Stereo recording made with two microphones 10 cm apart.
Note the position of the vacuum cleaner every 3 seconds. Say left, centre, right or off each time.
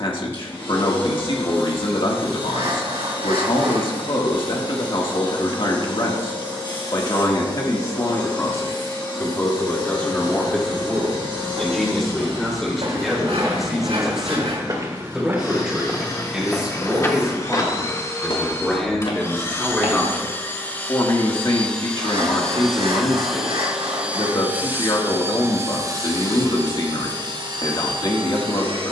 left, left, left, left, left, left, left, centre, right, right.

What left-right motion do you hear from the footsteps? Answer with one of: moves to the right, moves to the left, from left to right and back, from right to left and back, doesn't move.
moves to the left.